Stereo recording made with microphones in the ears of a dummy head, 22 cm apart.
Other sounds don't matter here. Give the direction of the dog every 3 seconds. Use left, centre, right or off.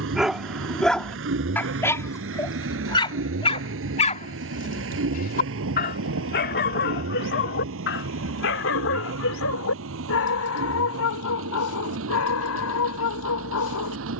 centre, left, left, left, left.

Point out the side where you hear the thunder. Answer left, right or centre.
right.